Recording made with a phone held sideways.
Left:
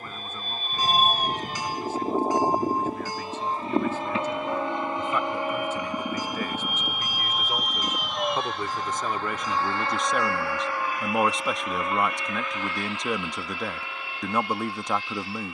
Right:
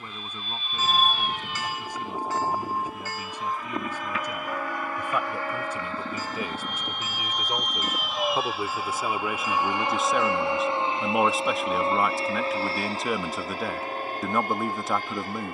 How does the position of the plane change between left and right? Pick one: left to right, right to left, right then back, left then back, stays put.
left to right.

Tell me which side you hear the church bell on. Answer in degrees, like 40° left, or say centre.
20° left.